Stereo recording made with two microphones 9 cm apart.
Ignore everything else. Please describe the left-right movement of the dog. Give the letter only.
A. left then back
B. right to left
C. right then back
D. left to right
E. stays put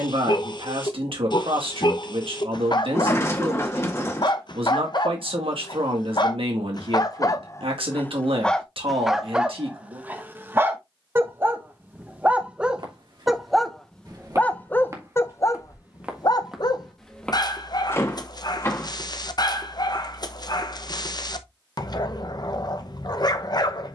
C.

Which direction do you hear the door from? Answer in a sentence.
You can hear the door on the left.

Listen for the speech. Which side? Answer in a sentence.
You can hear the speech on the right.